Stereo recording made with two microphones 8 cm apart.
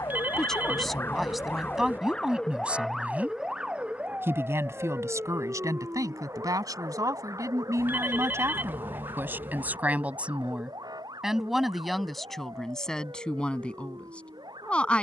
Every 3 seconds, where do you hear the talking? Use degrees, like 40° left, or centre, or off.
centre, 40° right, 40° right, 10° right, 10° left.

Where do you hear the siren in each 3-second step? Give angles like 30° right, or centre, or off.
20° left, 20° right, 40° right, 50° right, 60° right.